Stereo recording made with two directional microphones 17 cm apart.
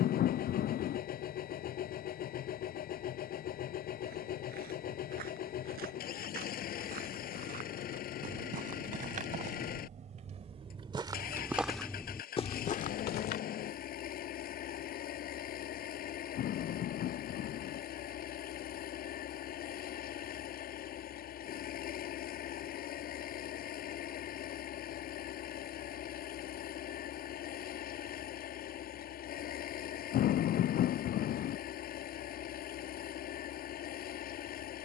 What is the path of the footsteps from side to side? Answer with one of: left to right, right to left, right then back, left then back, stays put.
right to left.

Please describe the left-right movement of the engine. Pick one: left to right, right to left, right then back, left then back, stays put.
stays put.